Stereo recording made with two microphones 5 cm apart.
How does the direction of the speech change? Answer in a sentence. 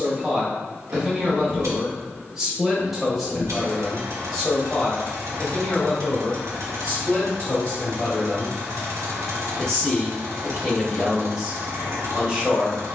In this clip you hear the speech move from right to left and back again.